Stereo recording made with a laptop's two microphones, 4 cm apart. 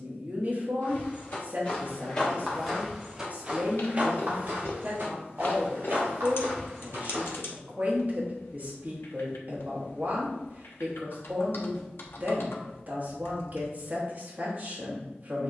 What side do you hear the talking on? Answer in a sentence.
You can hear the talking on the right.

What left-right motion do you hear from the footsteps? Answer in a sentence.
In this clip you hear the footsteps travel towards the right.